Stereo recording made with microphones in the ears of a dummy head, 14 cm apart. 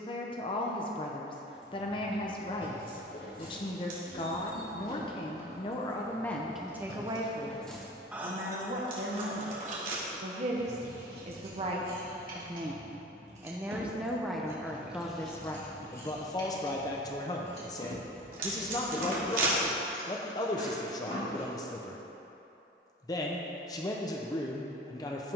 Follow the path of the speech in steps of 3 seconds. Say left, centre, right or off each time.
left, left, right, right, centre, left, left, left, left.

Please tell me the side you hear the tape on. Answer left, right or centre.
right.